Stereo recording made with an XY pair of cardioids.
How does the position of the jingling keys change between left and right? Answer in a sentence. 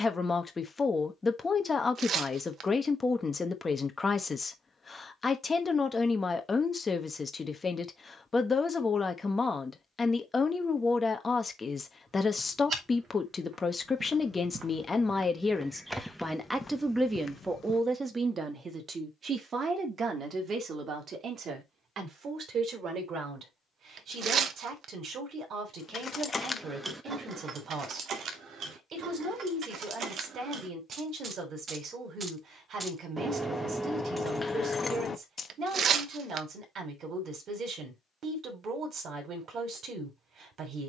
You can hear the jingling keys move from left to right and back again.